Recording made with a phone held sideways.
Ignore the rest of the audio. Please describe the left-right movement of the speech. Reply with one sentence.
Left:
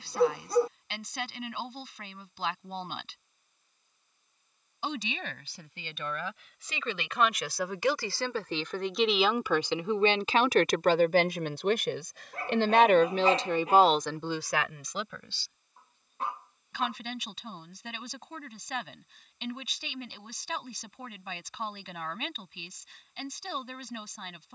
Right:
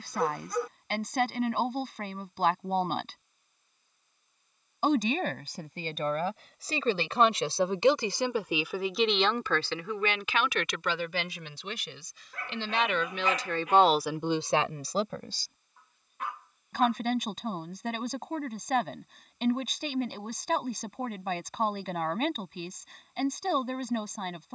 You can hear the speech go left and come back.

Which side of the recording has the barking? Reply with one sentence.
In this clip you hear the barking on the left.